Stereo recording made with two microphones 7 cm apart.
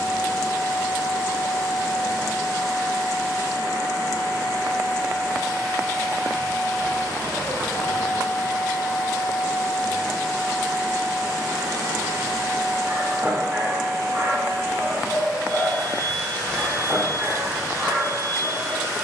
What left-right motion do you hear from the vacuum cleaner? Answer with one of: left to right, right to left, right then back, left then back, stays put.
left to right.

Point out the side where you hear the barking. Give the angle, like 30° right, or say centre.
30° right.